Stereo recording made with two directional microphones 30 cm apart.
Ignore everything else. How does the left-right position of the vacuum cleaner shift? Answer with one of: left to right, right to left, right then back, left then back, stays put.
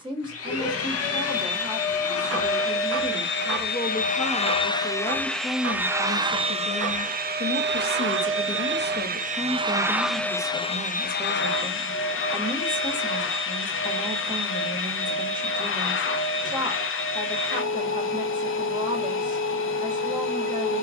right then back.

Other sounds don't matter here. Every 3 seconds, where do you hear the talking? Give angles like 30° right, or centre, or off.
10° right, centre, 20° left, 10° right, 20° right, 20° right, 20° right.